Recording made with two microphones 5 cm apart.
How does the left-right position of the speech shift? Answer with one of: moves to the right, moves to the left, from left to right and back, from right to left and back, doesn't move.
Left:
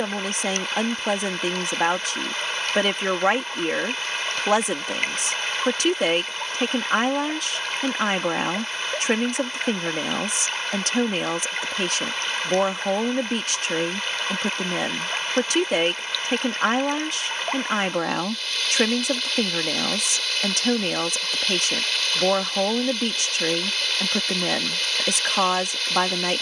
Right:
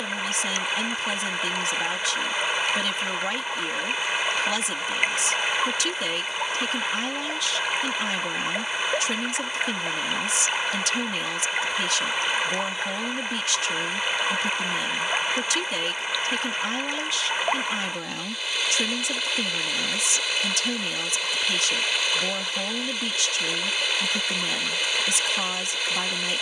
doesn't move.